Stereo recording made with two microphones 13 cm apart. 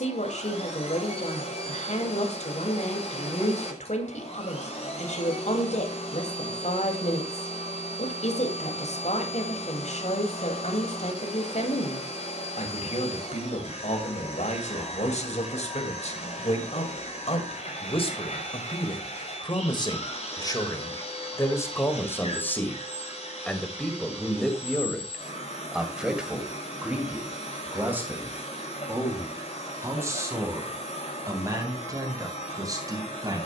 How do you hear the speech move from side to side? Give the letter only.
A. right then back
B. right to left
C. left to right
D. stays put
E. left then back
C.